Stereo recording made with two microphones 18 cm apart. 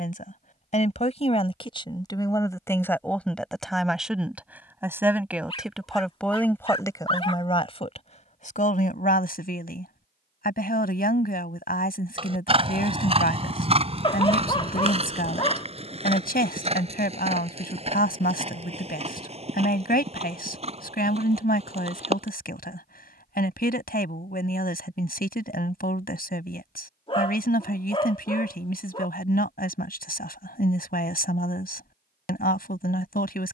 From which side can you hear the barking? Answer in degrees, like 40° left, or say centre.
30° left.